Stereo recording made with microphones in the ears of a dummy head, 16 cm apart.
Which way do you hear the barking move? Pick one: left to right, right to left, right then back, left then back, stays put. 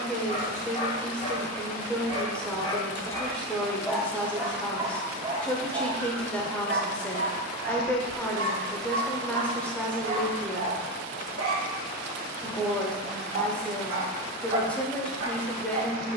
left to right.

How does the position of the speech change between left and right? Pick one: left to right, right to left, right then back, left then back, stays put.
stays put.